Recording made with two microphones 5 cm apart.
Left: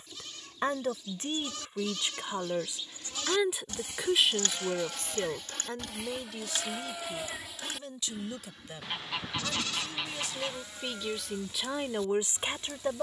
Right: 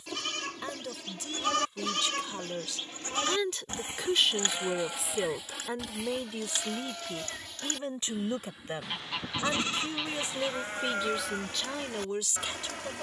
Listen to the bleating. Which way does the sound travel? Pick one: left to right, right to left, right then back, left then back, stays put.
left then back.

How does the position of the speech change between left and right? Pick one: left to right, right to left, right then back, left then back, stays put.
right then back.